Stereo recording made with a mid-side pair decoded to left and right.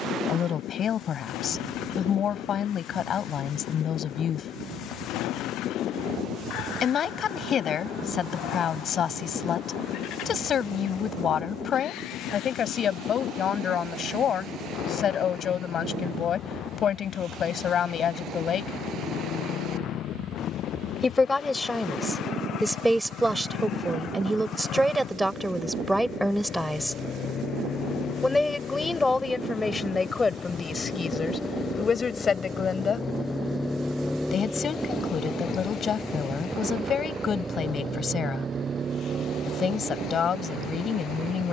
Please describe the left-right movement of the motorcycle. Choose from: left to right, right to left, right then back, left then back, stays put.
left to right.